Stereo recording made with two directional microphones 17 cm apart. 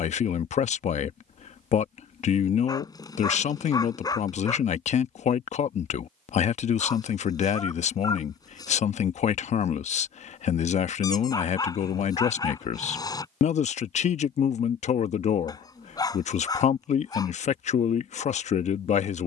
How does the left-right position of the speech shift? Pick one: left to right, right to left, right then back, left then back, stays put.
stays put.